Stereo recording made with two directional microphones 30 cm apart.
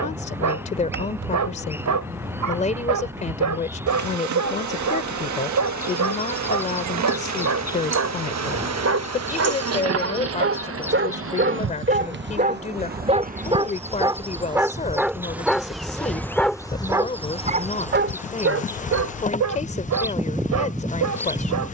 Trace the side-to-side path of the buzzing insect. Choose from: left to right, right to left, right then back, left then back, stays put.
right to left.